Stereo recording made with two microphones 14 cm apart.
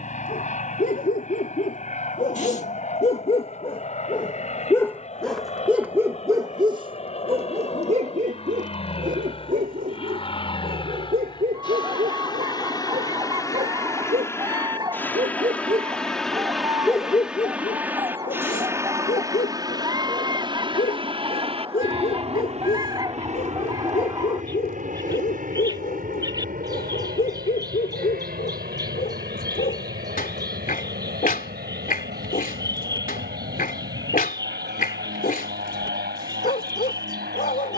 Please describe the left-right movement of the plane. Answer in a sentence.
You can hear the plane move to the right.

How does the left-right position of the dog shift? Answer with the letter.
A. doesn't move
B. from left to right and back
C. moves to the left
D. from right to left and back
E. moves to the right
B.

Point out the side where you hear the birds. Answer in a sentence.
You can hear the birds on the right.